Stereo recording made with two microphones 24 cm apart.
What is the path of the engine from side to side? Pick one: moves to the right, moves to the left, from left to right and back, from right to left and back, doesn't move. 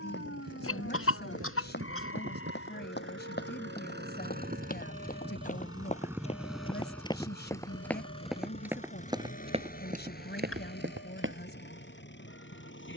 moves to the left.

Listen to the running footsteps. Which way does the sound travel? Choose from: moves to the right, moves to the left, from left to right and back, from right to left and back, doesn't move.
moves to the right.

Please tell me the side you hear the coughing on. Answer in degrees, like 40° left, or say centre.
60° left.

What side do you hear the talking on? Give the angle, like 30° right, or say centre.
50° left.